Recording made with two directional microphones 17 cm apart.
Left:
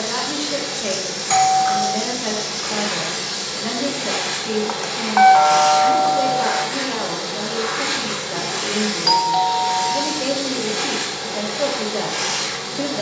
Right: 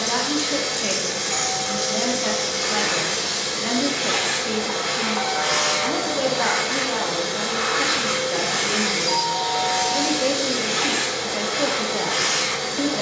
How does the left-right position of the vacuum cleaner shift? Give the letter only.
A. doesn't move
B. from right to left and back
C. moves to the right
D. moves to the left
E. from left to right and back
A.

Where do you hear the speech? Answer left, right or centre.
centre.